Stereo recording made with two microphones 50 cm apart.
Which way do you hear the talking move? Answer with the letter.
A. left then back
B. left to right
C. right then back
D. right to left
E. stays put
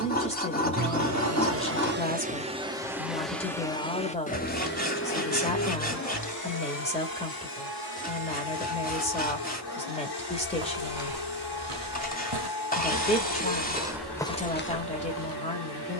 E.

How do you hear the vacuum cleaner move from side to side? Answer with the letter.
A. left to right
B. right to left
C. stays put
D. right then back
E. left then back
B.